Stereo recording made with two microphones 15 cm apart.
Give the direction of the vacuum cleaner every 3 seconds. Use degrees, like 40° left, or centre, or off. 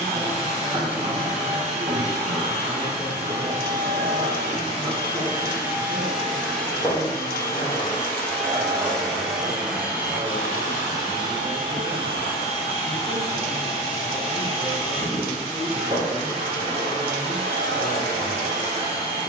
40° right, 30° right, 10° left, 20° right, 40° right, 40° right, 40° right.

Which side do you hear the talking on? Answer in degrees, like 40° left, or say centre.
30° right.